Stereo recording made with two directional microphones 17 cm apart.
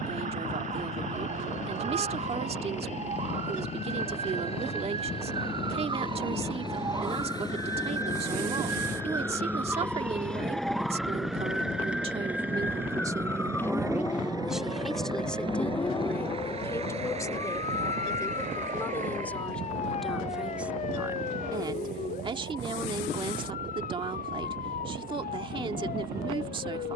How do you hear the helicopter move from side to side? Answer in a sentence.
In this clip you hear the helicopter move from left to right.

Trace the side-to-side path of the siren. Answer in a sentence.
In this clip you hear the siren go from the right side to the left.